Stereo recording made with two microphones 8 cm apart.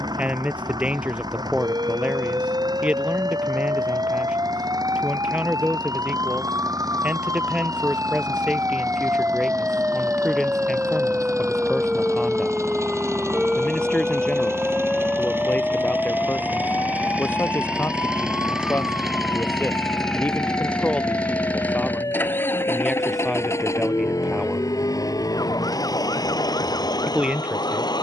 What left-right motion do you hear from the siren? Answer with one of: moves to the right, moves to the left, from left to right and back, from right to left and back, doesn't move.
moves to the left.